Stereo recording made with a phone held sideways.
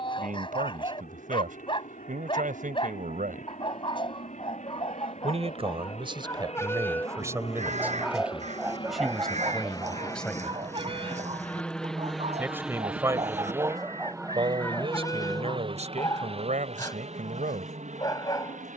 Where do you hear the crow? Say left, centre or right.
right.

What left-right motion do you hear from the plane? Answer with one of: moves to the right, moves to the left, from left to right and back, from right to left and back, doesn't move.
moves to the right.